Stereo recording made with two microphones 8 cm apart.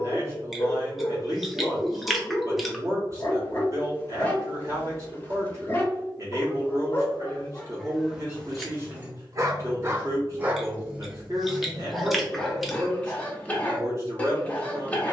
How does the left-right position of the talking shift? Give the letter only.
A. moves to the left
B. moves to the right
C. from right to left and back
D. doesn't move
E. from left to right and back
D.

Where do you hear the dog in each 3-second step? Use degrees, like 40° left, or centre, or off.
20° left, 20° left, 10° left, 20° right, 10° left.